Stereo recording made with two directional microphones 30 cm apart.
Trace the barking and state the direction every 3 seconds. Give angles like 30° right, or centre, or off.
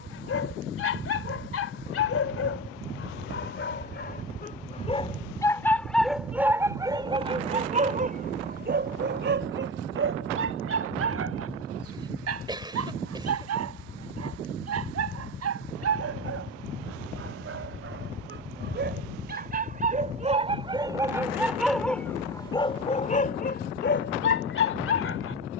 50° left, 30° left, 20° right, 40° right, 60° right, 50° right, 30° right, 10° left, 40° left.